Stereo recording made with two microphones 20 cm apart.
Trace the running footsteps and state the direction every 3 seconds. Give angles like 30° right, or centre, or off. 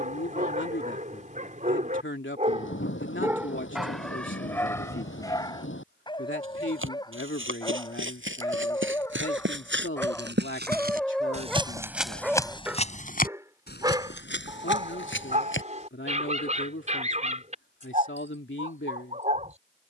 off, off, 80° right, 50° right, 40° left, 70° left, off.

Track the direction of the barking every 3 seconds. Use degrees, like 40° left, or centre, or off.
40° right, 10° left, 20° left, 10° left, 20° right, 30° right, 40° right.